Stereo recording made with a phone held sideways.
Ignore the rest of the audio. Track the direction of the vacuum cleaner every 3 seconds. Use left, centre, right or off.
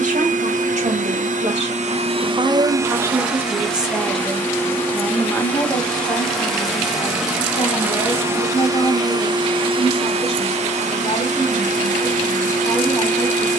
right, centre, centre, right, right.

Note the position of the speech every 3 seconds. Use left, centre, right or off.
right, centre, left, left, left.